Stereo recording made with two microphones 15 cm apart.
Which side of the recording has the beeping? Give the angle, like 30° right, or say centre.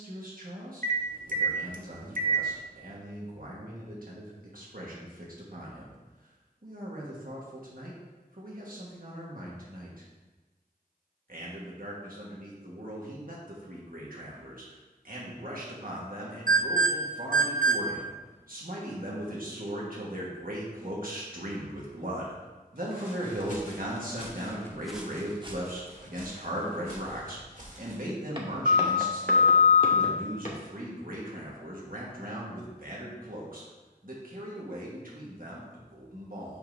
60° right.